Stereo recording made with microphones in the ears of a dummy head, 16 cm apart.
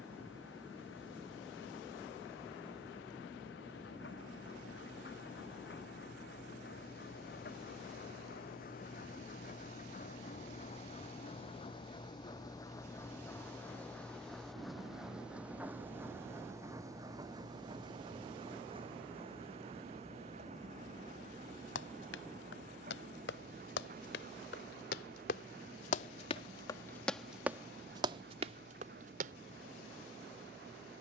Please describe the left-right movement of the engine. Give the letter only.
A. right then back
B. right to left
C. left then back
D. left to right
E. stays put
D.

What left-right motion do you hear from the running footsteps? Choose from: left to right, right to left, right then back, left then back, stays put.
left to right.